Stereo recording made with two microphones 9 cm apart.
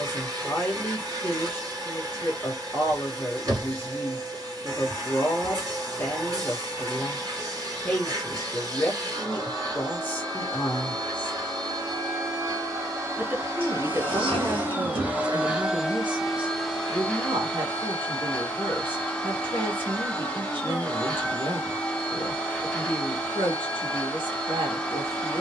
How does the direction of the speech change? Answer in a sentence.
In this clip you hear the speech move to the right.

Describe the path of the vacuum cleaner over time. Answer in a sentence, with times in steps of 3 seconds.
In this clip you hear the vacuum cleaner on the right from 0 s and in the centre from 15 s.